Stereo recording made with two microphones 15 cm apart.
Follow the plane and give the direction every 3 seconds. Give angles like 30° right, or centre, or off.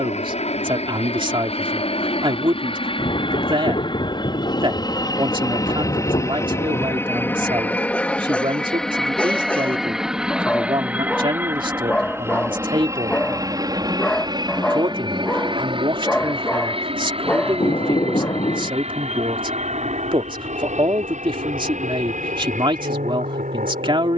40° left, 30° left, 10° left, 10° right, 20° right, 30° right, 40° right, 50° right.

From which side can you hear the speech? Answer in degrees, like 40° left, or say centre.
30° right.